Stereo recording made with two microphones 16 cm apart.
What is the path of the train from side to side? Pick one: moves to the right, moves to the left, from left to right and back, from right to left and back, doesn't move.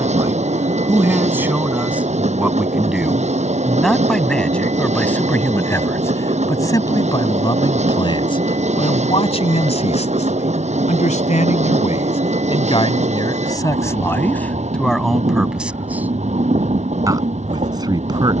doesn't move.